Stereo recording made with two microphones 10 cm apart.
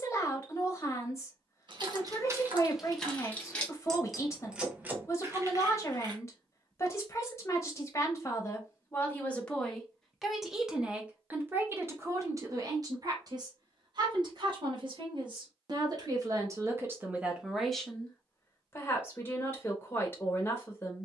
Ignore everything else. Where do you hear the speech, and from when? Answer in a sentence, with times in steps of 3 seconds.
In this clip you hear the speech on the left from 0 s, in the centre from 9 s, on the right from 12 s and on the left from 18 s.